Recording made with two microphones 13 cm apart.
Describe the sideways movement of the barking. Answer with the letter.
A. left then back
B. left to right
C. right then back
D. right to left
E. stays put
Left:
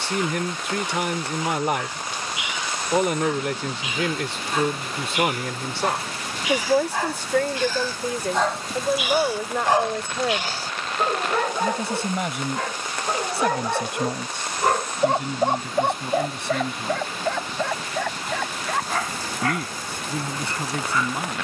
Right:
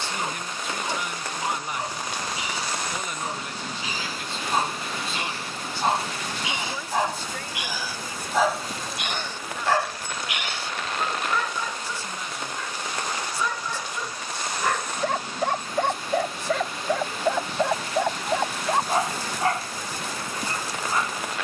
A.